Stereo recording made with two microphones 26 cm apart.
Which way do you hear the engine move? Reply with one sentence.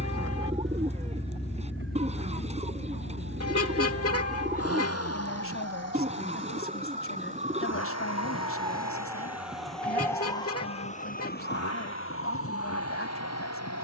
In this clip you hear the engine move from right to left.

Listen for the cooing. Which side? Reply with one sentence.
You can hear the cooing on the right.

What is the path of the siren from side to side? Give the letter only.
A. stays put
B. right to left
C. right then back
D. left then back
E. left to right
B.